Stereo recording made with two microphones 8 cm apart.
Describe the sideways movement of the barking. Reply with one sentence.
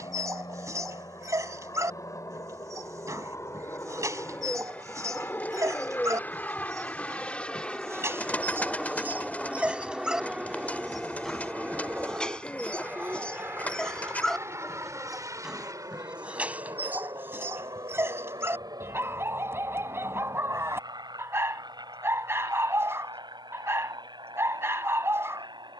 You can hear the barking go left and come back.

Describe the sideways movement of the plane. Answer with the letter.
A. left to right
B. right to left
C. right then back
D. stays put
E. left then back
A.